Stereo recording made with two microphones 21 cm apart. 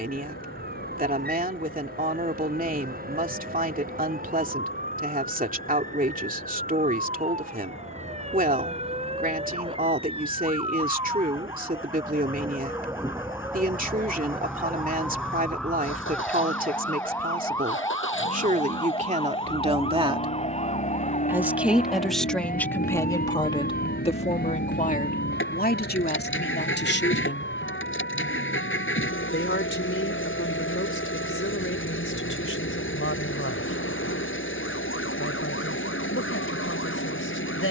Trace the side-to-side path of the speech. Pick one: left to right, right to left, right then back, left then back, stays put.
right to left.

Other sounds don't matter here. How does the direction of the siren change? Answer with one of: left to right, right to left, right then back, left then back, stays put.
right to left.